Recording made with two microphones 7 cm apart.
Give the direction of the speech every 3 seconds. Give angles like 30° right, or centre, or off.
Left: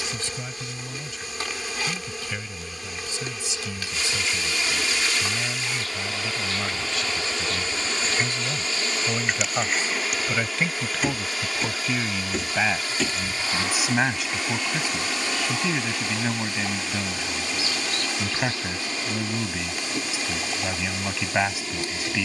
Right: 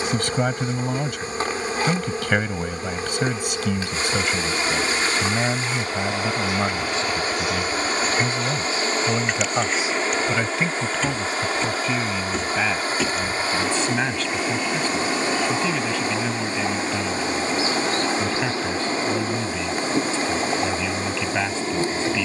60° right, 50° right, 30° right, 10° right, 10° left, 10° left, 10° left, 10° left.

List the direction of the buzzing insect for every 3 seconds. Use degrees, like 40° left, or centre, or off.
40° right, 30° right, 10° right, 10° left, 10° right, 30° right, 30° right, 30° right.